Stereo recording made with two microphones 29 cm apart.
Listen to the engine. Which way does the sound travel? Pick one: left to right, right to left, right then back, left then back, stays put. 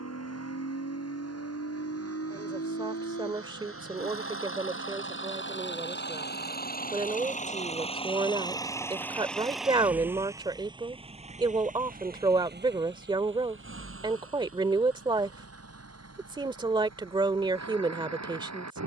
left to right.